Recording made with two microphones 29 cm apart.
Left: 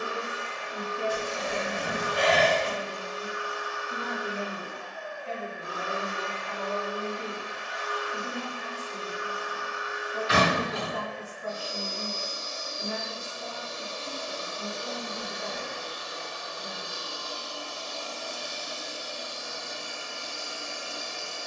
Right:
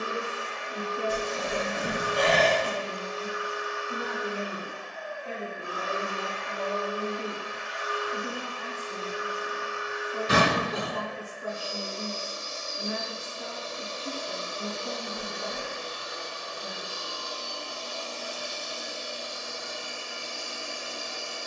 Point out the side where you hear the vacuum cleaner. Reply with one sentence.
You can hear the vacuum cleaner on the right.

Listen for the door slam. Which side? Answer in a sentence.
You can hear the door slam on the right.